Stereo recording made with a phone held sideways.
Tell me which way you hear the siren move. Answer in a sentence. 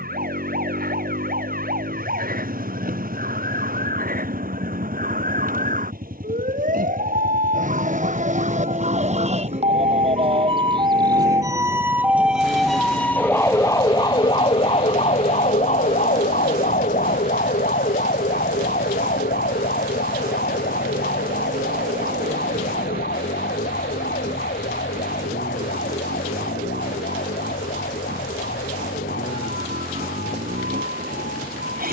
You can hear the siren move from right to left.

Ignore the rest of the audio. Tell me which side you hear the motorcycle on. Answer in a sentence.
You can hear the motorcycle on the right.